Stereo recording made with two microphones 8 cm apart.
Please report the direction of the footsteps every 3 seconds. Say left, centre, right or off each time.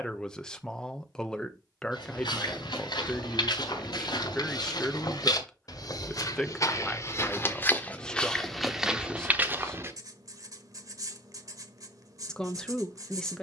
left, left, left, right, off.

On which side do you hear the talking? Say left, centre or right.
centre.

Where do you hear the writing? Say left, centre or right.
right.